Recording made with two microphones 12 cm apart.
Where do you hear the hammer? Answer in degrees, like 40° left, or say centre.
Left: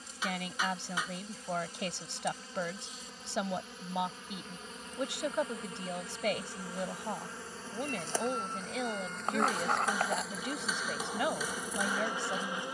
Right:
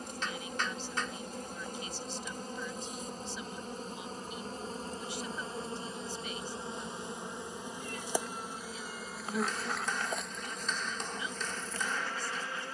10° left.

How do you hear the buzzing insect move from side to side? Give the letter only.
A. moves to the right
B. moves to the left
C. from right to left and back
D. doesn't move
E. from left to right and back
B.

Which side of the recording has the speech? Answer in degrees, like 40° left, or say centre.
70° left.